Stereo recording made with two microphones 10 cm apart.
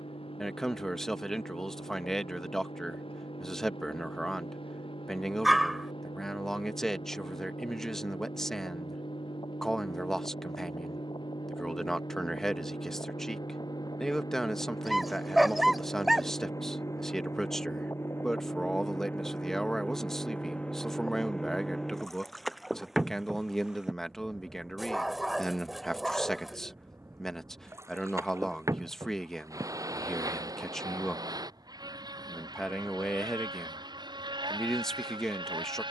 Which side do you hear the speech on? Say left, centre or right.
centre.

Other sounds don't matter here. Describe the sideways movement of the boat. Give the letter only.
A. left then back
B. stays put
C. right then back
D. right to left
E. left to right
E.